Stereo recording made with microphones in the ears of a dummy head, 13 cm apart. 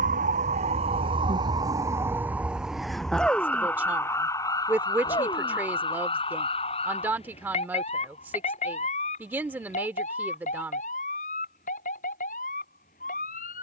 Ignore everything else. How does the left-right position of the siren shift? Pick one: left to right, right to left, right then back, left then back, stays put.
right to left.